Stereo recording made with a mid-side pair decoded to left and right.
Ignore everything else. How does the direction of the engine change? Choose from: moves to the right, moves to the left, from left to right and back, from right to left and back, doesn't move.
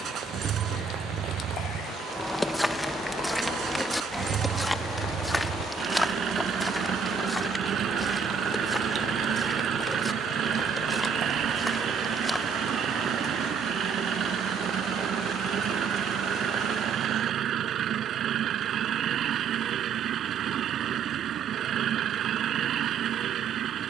doesn't move.